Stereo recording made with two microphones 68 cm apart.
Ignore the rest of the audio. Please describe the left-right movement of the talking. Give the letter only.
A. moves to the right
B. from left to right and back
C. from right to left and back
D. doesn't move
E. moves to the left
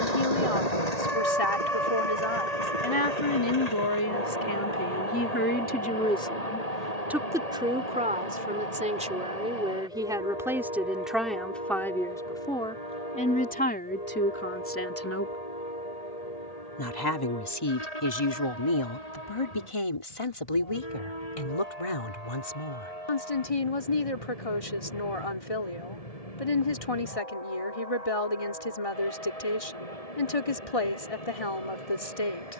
B.